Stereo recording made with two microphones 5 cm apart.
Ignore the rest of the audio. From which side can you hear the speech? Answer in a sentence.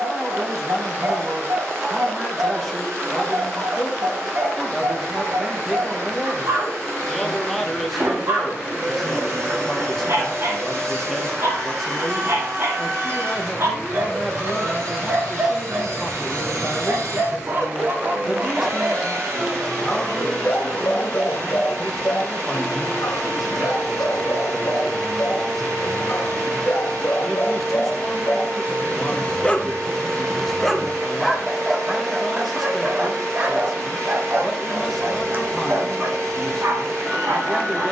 You can hear the speech in the centre.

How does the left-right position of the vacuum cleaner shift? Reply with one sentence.
You can hear the vacuum cleaner stay in one place.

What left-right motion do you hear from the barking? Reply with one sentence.
In this clip you hear the barking go left and come back.